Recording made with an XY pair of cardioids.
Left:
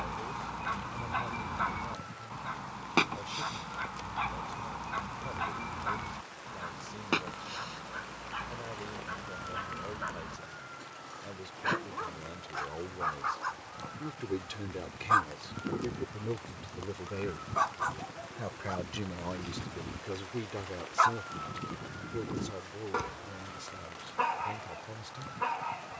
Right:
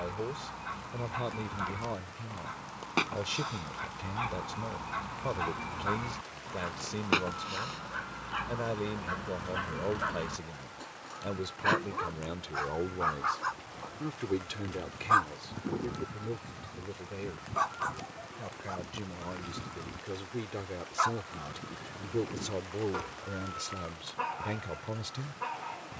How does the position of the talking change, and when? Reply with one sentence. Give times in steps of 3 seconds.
In this clip you hear the talking on the right from 0 s, in the centre from 15 s and on the right from 21 s.